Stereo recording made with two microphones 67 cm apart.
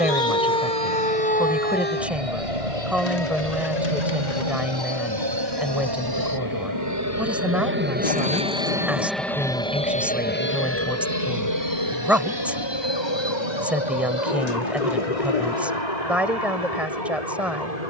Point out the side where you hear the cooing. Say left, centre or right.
left.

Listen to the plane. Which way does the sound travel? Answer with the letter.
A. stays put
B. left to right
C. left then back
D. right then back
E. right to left
E.